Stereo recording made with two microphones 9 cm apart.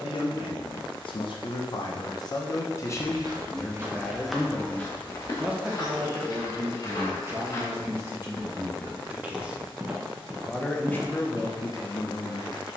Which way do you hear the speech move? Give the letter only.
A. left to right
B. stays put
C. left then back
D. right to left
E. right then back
E.